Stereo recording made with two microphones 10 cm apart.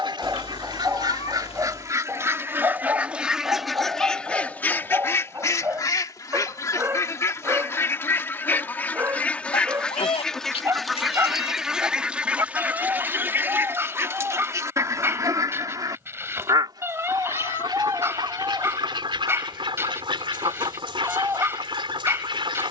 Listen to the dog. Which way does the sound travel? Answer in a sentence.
In this clip you hear the dog stay in one place.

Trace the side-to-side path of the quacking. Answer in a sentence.
You can hear the quacking move from right to left and back again.